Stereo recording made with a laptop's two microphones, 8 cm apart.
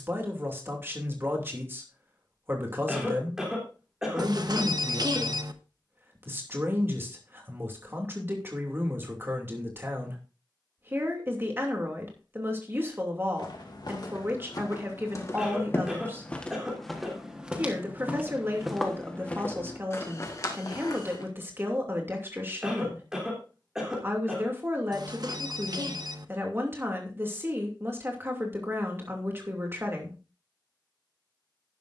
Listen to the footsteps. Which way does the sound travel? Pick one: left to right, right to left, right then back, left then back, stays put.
right then back.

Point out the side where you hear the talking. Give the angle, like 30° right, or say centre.
30° right.